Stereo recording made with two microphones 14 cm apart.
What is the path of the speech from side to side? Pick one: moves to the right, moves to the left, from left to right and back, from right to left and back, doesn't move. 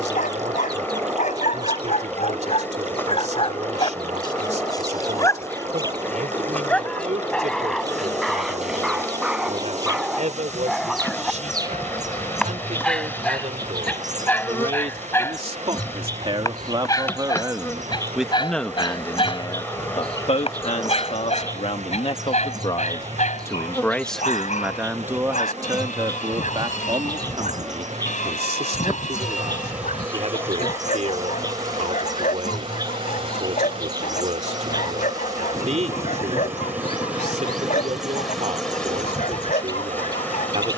from right to left and back.